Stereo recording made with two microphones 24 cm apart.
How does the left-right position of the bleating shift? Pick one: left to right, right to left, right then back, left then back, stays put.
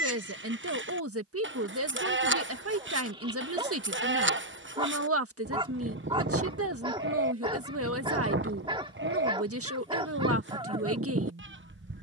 stays put.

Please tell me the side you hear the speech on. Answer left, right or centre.
right.